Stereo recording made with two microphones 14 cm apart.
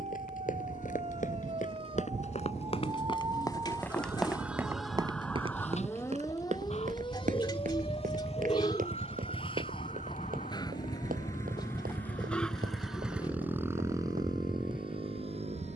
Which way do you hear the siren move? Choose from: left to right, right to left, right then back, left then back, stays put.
right to left.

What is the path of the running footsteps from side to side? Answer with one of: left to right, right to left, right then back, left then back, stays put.
left to right.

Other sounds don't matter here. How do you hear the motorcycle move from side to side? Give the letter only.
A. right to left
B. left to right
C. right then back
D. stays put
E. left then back
B.